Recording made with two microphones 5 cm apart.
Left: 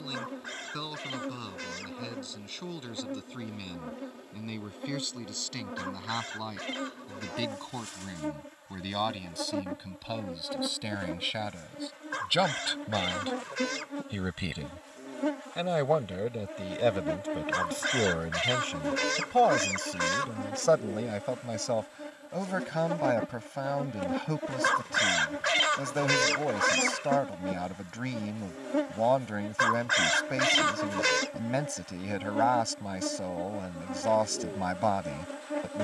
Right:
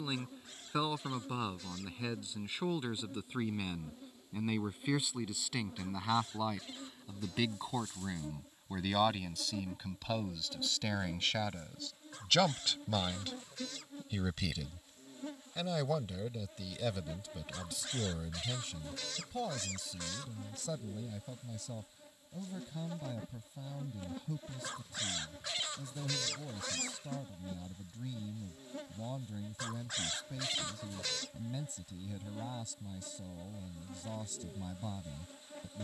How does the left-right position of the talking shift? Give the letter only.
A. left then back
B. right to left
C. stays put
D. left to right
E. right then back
B.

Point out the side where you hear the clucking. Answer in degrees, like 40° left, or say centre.
80° left.